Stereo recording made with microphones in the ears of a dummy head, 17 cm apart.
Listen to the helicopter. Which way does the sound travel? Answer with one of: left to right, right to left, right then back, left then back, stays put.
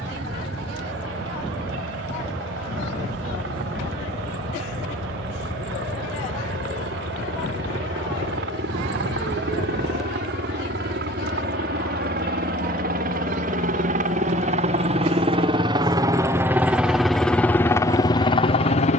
right to left.